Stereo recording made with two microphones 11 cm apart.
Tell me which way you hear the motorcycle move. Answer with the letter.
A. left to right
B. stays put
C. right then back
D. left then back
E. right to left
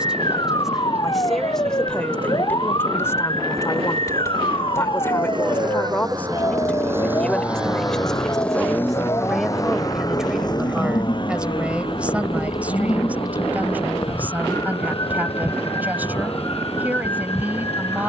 E.